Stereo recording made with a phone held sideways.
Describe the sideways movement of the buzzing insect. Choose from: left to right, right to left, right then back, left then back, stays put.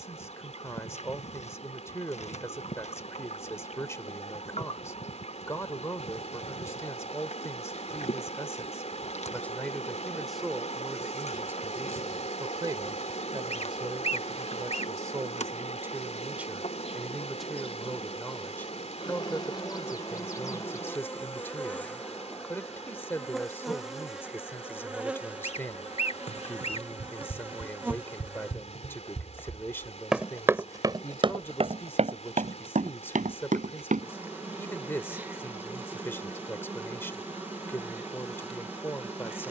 left to right.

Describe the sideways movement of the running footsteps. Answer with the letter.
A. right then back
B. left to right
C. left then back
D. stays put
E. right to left
B.